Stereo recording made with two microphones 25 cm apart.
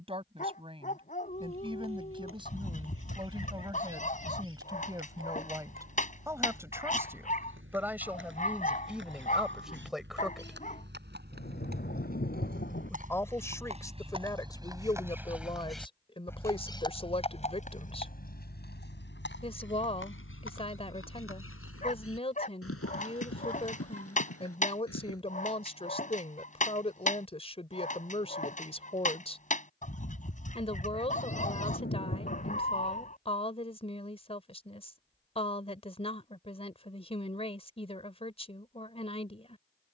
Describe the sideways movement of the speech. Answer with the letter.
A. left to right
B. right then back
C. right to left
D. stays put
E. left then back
C.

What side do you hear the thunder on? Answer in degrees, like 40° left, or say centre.
40° left.